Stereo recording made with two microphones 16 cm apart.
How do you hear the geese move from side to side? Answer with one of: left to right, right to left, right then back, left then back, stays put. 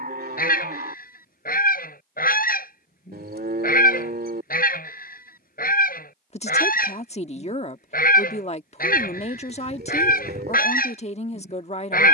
stays put.